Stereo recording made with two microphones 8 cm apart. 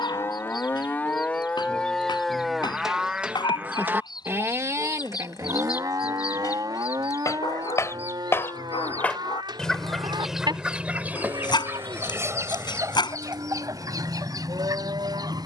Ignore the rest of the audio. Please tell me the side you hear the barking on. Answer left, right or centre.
left.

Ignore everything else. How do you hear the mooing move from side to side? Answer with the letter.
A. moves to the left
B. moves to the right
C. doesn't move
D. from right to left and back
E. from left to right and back
B.